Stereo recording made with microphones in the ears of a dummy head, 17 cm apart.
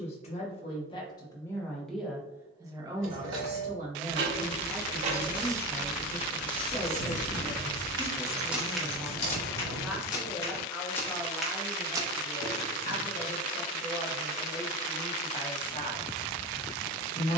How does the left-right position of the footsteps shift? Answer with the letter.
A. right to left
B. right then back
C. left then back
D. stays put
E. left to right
C.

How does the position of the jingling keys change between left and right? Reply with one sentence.
You can hear the jingling keys travel towards the left.